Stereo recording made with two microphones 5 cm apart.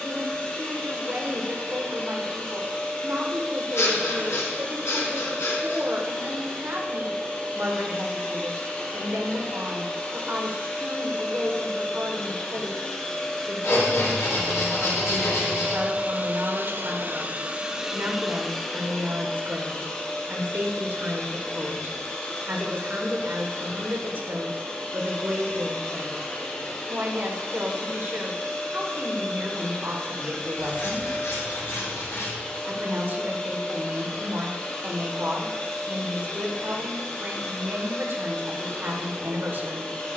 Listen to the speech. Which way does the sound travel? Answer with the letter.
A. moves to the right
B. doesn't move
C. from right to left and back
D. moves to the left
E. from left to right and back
B.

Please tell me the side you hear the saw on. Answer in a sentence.
In this clip you hear the saw on the left.